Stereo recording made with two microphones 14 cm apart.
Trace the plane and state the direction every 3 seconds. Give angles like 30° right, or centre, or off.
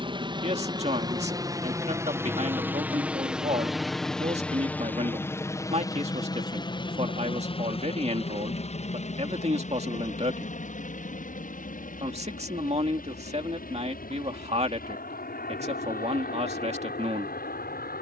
20° right, 10° left, 40° left, 60° left, 70° left, 70° left.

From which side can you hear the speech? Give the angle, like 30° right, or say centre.
50° right.